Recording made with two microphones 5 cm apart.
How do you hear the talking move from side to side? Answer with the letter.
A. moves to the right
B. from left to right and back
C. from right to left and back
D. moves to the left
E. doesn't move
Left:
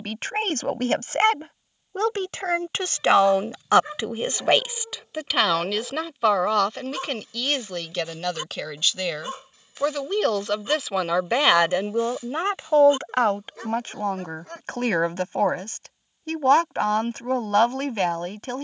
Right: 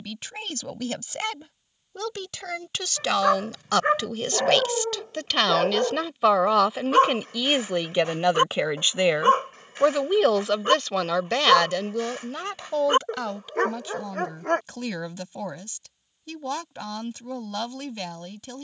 B.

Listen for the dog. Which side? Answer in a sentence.
In this clip you hear the dog on the right.